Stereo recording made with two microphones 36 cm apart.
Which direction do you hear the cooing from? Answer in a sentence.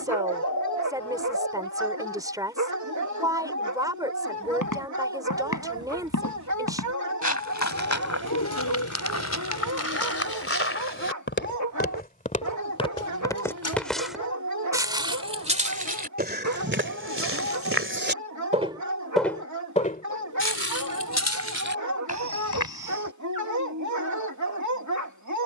You can hear the cooing on the left.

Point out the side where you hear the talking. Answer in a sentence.
You can hear the talking in the centre.